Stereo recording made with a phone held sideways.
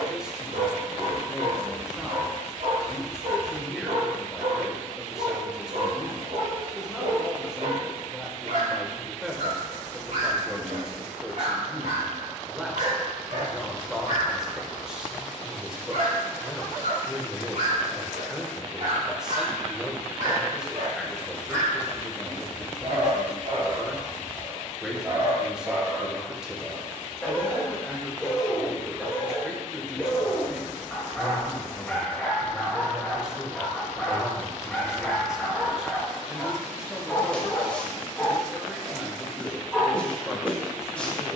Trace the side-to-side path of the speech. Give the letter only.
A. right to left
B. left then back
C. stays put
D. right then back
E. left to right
C.